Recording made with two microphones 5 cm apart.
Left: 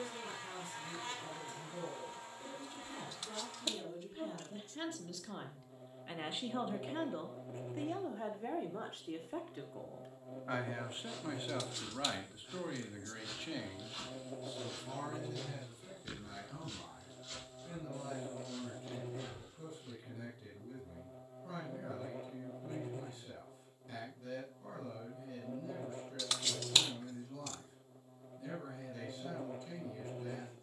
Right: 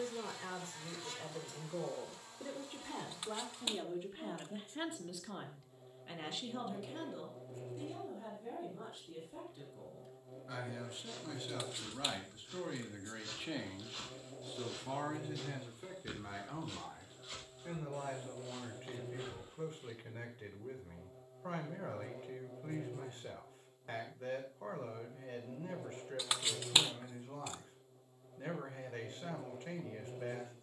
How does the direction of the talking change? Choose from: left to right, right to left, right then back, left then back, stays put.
left then back.